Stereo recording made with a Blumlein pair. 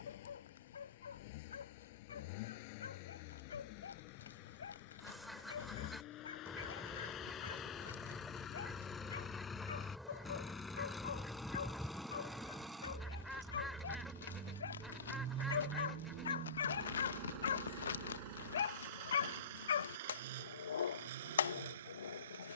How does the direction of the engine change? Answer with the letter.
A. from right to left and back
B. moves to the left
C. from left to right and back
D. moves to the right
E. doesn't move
D.